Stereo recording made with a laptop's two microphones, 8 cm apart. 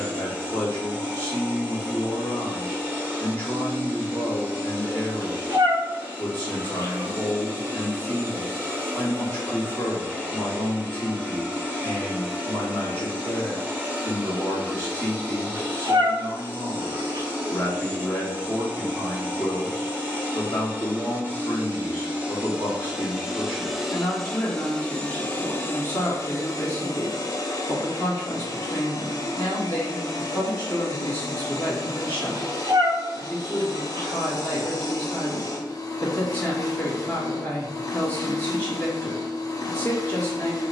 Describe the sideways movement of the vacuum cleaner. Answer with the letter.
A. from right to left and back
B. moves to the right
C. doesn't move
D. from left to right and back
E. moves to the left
E.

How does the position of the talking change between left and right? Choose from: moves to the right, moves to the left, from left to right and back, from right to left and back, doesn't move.
doesn't move.